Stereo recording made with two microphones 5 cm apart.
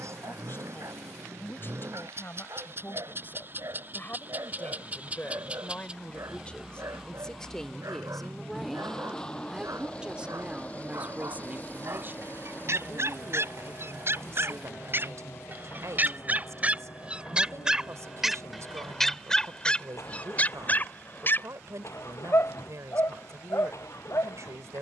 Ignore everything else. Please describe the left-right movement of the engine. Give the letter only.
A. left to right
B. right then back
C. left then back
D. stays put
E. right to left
E.